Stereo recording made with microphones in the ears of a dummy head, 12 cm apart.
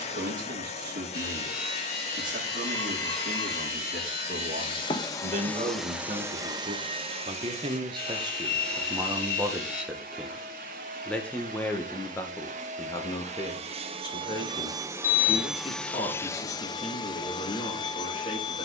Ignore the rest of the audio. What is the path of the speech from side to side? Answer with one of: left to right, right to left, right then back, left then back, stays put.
right to left.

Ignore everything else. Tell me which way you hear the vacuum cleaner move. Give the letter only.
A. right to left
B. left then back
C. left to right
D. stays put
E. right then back
E.